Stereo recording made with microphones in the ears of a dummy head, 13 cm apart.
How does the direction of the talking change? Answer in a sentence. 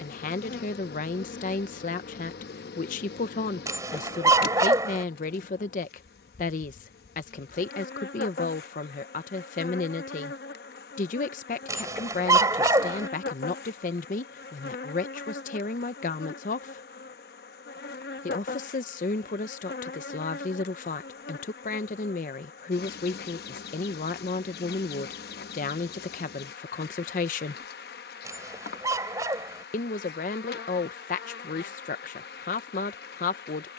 In this clip you hear the talking stay in one place.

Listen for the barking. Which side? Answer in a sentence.
You can hear the barking on the right.